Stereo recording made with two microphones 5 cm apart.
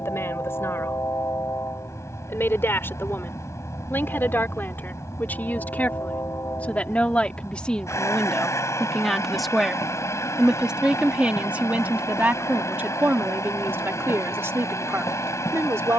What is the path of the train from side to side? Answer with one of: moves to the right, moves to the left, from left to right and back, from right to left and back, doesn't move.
doesn't move.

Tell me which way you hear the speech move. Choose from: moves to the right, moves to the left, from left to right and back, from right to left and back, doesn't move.
moves to the right.